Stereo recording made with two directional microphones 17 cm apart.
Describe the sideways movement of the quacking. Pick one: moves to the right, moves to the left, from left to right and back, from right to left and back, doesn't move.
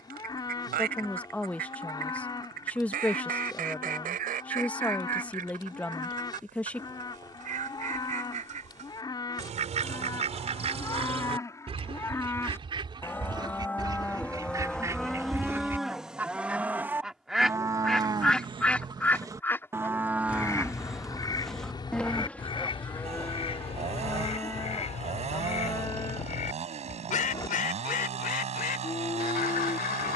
moves to the left.